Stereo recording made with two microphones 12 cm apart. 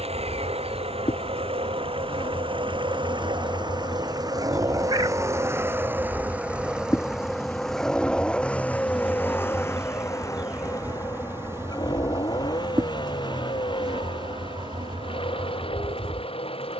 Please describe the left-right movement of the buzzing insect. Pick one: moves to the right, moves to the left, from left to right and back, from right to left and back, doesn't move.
moves to the right.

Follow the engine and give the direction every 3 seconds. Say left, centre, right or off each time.
right, right, centre, left, left, left.